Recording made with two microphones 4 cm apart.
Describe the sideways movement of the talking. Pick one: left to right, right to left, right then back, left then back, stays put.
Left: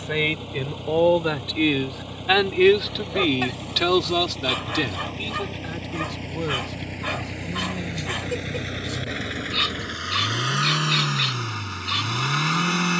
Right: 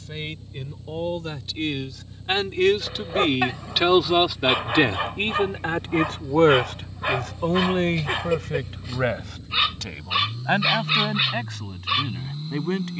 left to right.